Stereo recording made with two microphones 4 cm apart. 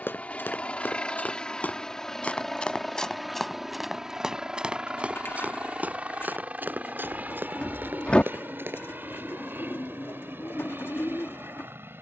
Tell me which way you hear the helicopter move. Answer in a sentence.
In this clip you hear the helicopter move to the right.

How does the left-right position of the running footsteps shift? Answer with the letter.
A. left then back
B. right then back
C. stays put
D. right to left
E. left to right
E.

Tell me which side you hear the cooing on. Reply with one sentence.
In this clip you hear the cooing on the left.